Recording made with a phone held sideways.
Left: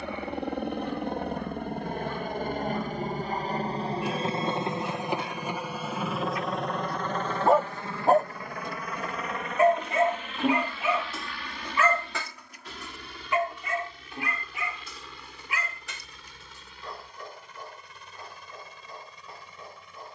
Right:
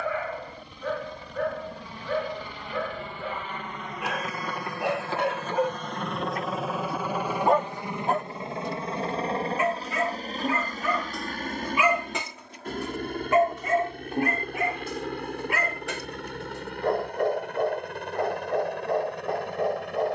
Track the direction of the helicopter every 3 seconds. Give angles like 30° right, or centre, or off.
50° left, 20° left, 10° right, 30° right, 50° right, 50° right, 60° right.